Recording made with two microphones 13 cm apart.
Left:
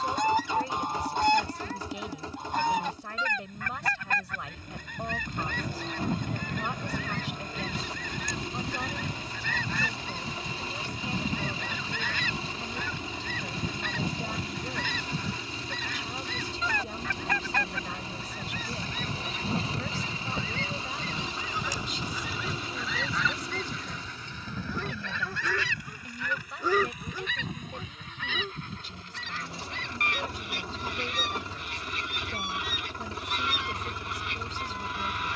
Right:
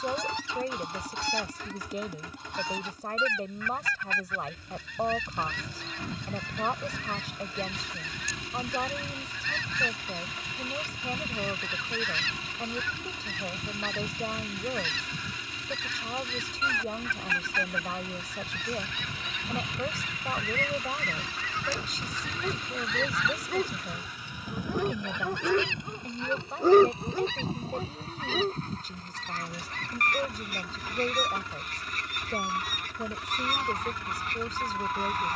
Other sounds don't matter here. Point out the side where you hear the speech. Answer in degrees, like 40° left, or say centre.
40° right.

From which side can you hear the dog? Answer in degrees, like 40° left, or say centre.
50° right.